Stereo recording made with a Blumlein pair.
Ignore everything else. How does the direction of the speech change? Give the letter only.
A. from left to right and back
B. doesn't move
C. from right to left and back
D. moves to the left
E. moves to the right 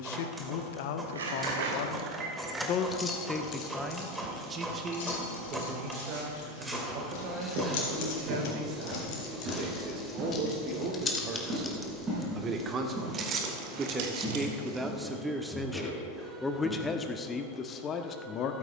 A.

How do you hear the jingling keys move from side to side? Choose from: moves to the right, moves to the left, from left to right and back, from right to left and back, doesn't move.
from right to left and back.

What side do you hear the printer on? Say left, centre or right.
centre.